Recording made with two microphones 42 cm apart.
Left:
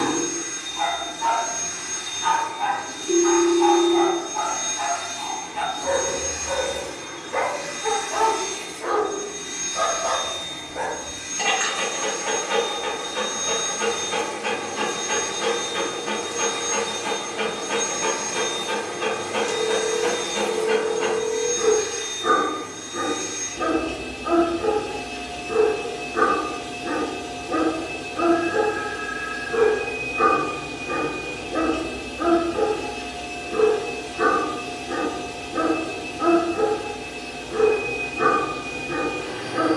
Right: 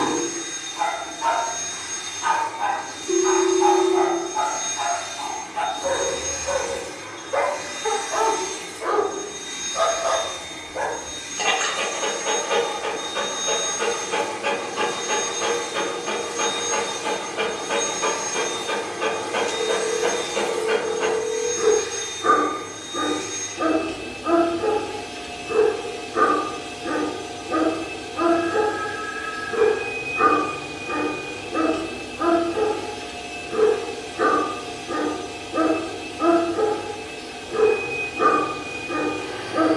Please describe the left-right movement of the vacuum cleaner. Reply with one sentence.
In this clip you hear the vacuum cleaner go right and come back.